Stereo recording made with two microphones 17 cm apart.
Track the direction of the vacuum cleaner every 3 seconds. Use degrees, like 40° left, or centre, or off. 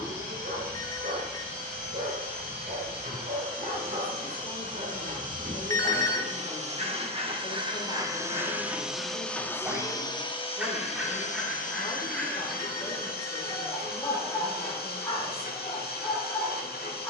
70° right, 60° right, 30° right, 30° left, 60° left, 70° left.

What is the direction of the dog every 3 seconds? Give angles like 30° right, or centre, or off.
60° right, 60° right, 40° right, 10° right, 20° left, 20° left.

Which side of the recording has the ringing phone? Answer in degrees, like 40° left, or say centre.
20° left.